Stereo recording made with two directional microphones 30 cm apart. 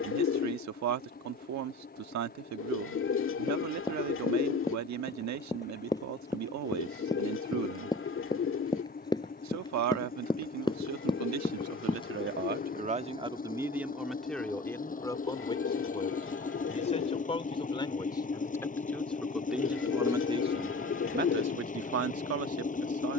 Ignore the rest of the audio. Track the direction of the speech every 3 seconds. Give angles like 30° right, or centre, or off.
60° right, 60° right, 60° right, 60° right, 10° right, 20° left, centre, 50° right.